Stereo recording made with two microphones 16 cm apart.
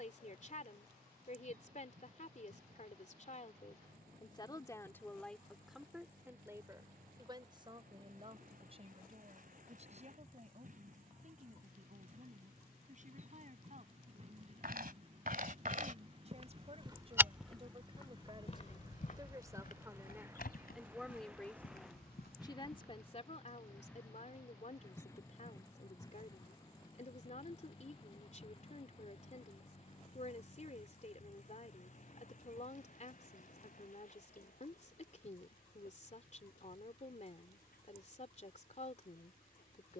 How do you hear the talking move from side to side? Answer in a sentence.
You can hear the talking go right and come back.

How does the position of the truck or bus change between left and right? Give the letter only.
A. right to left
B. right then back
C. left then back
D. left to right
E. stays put
A.